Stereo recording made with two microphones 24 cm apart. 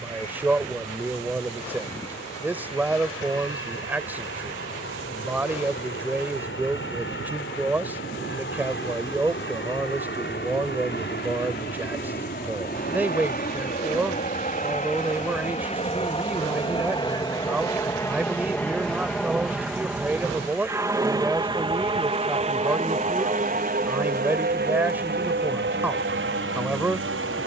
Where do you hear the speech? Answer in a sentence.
In this clip you hear the speech in the centre.